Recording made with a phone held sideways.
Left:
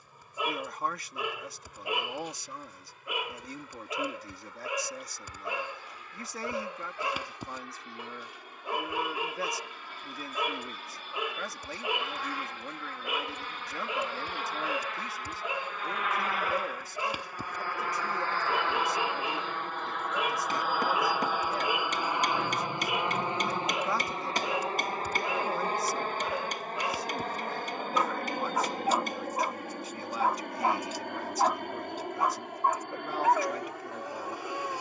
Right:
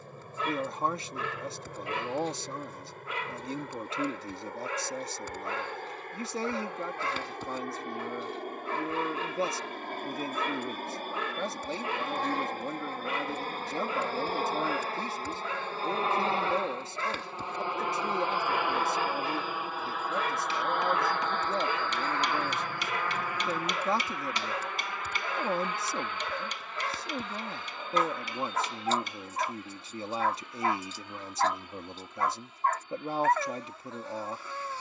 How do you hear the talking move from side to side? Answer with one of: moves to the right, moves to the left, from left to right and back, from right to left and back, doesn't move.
doesn't move.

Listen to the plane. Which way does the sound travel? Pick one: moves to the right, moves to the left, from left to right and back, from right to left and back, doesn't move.
moves to the left.